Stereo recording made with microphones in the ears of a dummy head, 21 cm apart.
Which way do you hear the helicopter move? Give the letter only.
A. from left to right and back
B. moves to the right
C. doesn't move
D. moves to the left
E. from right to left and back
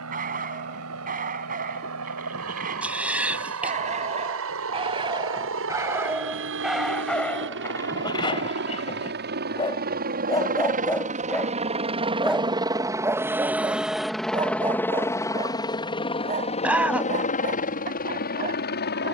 D.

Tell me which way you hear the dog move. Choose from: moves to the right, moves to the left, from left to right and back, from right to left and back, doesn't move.
from right to left and back.